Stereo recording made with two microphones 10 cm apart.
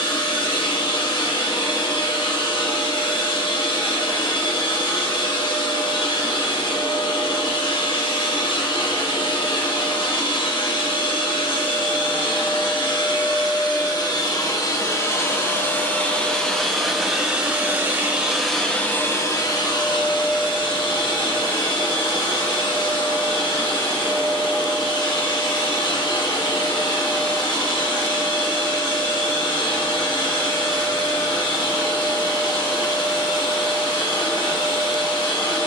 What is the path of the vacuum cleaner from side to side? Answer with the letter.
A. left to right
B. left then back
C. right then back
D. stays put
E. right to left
C.